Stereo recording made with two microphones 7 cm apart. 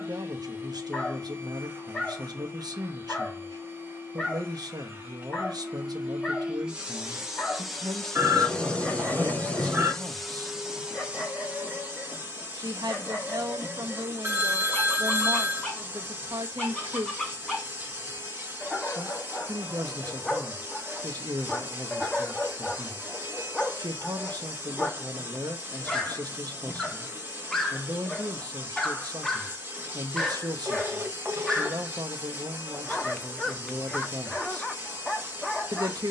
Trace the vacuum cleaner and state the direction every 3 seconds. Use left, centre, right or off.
right, right, centre, centre, right, right, right, right, right, right, right, right.